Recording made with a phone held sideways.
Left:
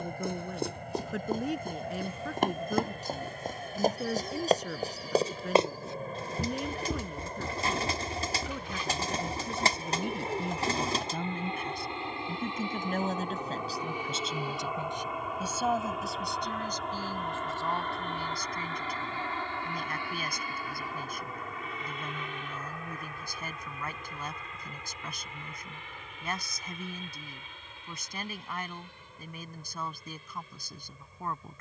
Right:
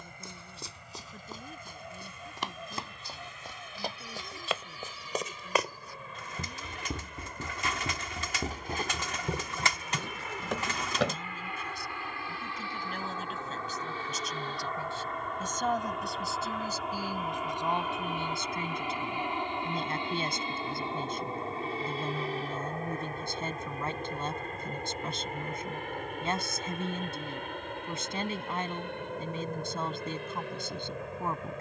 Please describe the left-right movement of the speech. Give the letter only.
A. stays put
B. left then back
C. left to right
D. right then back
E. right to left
C.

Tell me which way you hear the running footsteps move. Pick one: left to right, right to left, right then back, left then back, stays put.
left to right.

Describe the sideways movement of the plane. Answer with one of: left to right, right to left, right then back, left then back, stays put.
left to right.